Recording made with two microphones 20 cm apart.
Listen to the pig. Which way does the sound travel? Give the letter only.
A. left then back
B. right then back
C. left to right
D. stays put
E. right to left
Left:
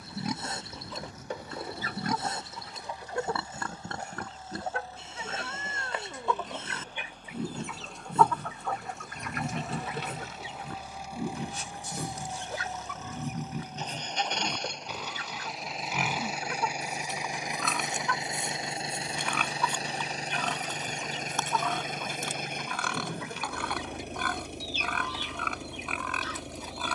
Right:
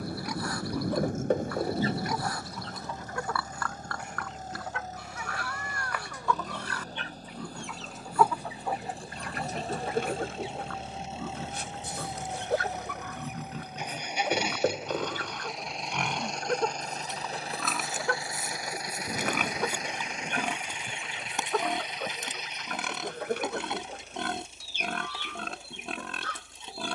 C.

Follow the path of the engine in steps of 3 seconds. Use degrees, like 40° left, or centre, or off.
50° right, 40° right, 40° right, 30° right, 10° right, 10° left, 30° left, 50° left, 60° left.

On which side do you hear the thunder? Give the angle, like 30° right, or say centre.
60° right.